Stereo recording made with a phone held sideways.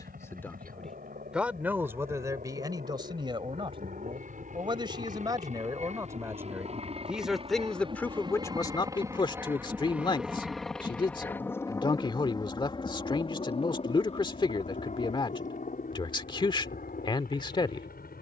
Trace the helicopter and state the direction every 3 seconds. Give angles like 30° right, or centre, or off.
70° right, 60° right, 40° right, centre, 30° left, 50° left.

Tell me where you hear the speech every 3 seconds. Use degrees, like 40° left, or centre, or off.
10° right, 30° right, centre, 30° left, 30° left, 30° left.